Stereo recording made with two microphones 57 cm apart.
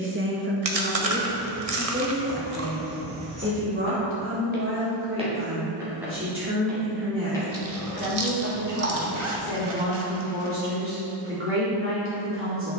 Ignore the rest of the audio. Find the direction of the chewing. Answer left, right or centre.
right.